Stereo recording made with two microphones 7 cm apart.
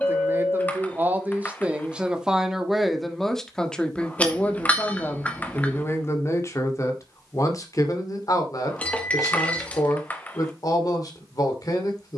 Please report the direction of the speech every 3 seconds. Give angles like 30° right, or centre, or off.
20° right, 20° left, 40° left, 50° left.